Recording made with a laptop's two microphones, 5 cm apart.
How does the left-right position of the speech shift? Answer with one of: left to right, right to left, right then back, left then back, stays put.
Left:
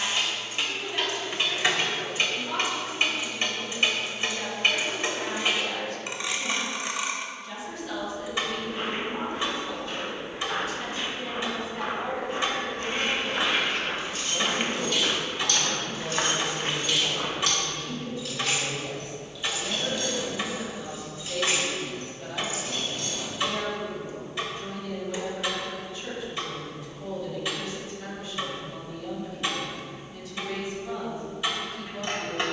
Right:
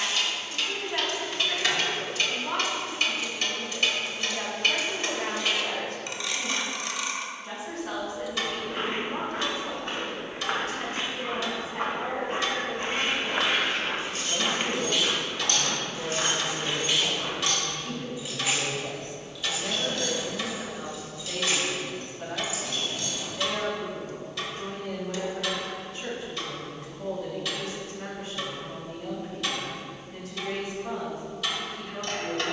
stays put.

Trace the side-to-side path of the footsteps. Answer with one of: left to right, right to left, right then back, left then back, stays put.
right to left.